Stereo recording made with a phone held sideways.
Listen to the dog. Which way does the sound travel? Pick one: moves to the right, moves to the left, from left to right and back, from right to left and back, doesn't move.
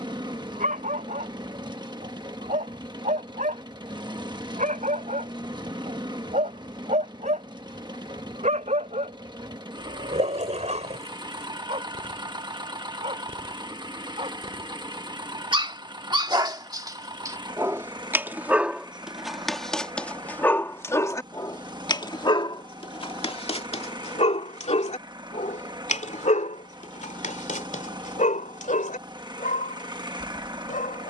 moves to the left.